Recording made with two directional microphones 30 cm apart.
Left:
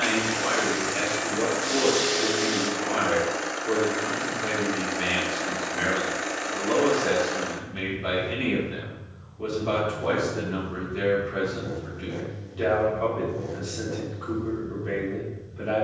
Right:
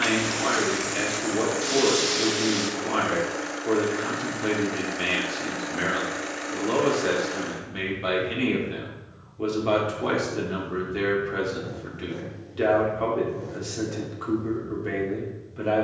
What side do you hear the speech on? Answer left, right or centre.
right.